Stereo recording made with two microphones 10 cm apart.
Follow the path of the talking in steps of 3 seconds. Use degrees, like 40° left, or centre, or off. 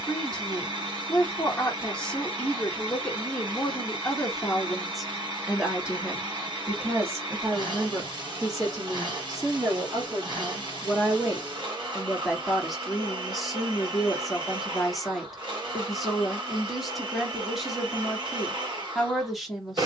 10° left, centre, 30° right, 30° right, centre, centre, centre.